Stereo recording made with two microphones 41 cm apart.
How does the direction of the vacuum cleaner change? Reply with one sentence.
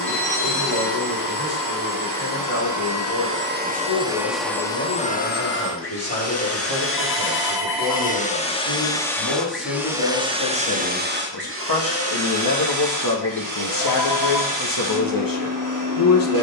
You can hear the vacuum cleaner go left and come back.